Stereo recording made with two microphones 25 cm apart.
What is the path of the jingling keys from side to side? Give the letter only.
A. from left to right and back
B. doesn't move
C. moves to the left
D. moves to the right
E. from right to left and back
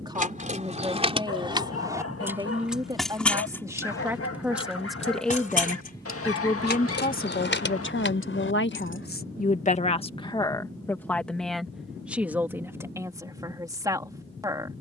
C.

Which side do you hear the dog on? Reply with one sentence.
You can hear the dog on the left.